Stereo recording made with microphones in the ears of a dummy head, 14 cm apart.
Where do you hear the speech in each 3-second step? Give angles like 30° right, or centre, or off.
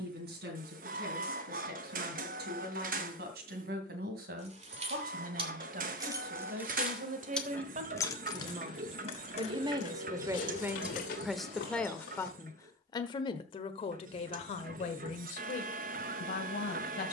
70° right, 70° right, 50° right, 10° right, 30° left, 60° left.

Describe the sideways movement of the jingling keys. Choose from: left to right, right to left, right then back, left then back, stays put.
right to left.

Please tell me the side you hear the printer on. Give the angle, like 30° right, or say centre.
60° right.